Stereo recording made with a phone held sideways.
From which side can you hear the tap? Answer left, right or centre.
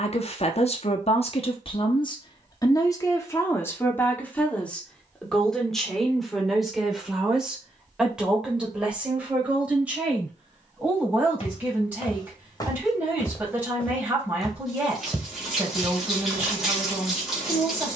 centre.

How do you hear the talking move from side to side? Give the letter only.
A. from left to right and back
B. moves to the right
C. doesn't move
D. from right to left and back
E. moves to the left
B.